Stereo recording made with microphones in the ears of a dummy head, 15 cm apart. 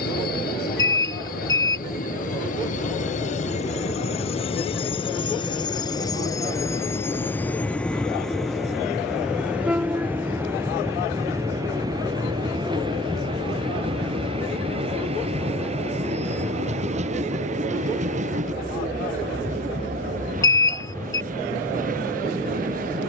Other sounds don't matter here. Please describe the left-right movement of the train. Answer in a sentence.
You can hear the train move from left to right.